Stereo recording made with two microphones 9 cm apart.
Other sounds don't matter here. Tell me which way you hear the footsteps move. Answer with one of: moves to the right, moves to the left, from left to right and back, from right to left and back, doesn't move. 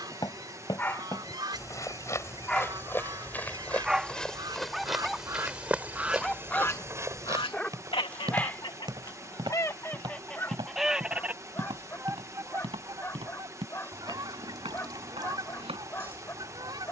moves to the right.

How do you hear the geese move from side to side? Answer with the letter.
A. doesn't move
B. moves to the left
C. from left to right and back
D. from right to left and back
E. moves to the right
D.